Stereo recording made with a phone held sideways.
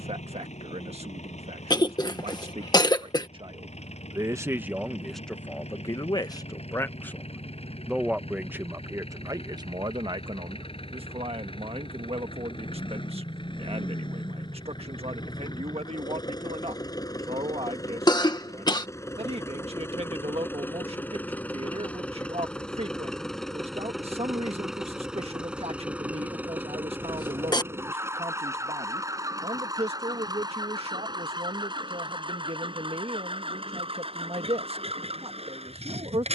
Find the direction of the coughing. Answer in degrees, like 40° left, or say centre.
30° left.